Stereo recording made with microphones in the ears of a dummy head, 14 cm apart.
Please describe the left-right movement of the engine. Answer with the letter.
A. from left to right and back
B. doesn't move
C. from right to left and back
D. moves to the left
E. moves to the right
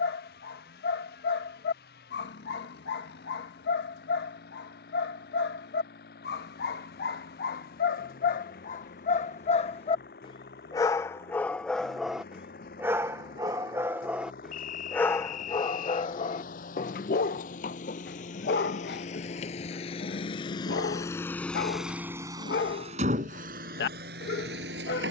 E.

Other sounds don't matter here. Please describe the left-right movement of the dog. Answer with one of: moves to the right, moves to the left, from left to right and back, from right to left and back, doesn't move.
from left to right and back.